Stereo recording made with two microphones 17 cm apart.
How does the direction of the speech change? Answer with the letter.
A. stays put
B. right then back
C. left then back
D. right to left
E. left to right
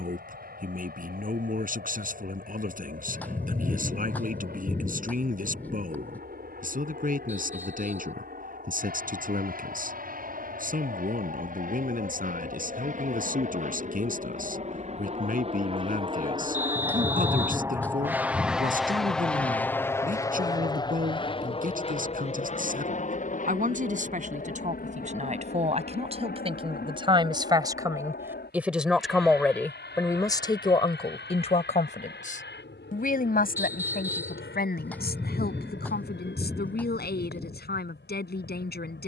D.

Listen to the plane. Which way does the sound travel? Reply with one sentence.
You can hear the plane move to the left.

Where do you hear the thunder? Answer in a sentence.
In this clip you hear the thunder in the centre.